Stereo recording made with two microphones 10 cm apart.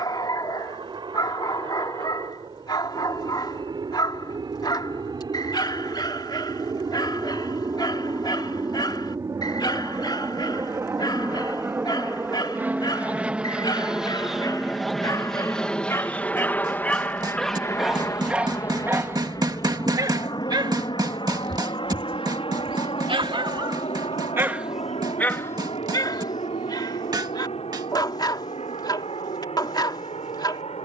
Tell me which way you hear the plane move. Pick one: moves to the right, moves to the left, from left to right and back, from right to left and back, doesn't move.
moves to the left.